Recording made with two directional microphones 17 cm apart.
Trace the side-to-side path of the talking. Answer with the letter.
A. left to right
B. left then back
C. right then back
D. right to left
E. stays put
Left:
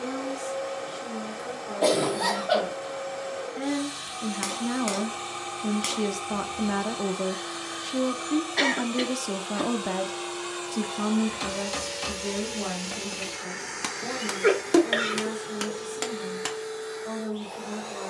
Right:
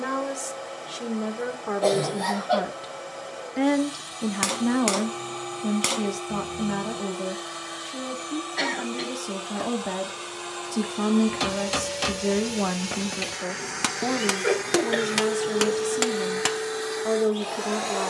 B.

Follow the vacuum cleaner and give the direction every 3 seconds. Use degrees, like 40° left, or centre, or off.
20° left, 20° left, 20° left, 10° left, 10° right, 50° right.